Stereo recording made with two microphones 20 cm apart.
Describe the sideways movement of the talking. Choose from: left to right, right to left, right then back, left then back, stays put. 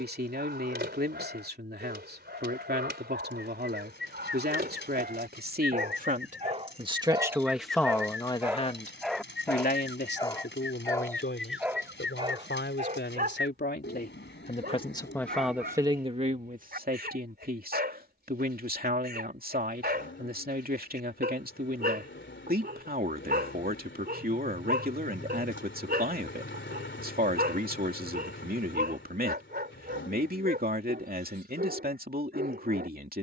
left then back.